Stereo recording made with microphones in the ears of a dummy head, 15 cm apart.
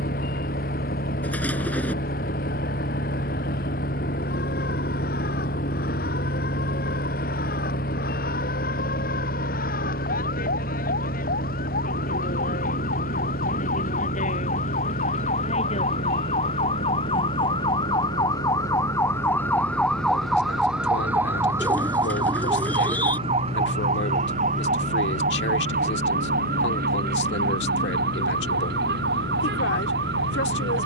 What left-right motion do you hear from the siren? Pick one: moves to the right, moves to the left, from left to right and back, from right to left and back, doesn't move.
moves to the right.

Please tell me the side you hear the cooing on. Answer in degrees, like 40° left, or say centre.
10° left.